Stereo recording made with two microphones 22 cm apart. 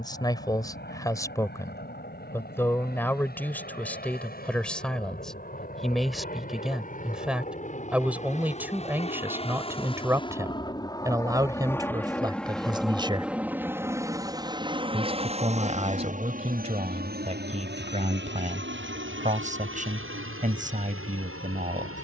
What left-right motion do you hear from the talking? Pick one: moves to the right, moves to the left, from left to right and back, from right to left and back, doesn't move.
moves to the right.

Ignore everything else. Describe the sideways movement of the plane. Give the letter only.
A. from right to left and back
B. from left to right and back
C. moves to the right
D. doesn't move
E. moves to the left
C.